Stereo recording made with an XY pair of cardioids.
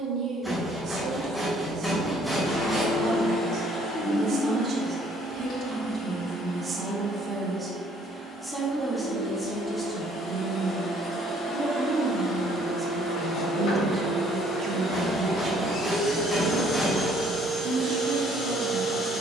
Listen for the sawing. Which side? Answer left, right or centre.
centre.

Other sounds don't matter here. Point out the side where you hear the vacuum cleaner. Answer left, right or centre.
left.